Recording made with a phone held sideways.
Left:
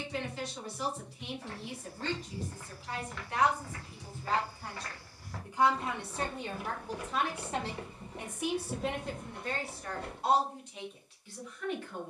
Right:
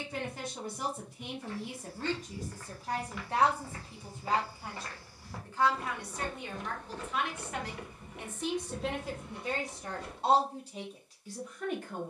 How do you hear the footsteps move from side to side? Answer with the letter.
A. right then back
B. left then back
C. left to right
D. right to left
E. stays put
A.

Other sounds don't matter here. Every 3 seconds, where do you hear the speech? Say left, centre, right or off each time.
right, centre, left, right.